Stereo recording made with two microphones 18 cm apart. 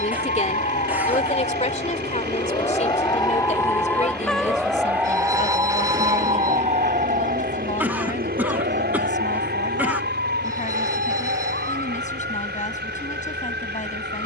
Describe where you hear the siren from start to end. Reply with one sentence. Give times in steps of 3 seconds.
You can hear the siren on the left from 0 s, in the centre from 3 s and on the right from 6 s.